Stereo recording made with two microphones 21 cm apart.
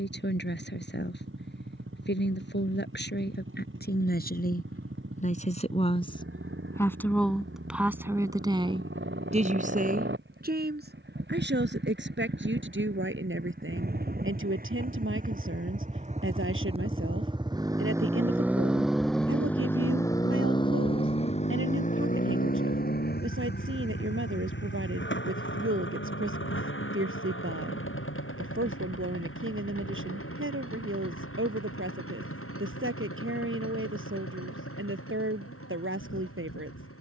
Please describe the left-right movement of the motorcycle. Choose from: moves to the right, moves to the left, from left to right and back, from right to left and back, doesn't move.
moves to the left.